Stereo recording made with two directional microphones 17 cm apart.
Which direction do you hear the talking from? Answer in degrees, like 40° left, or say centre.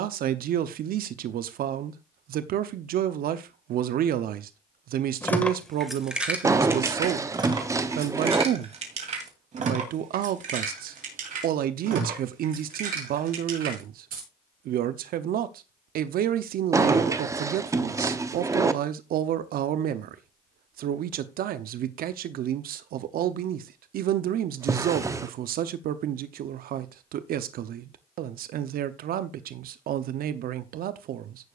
60° right.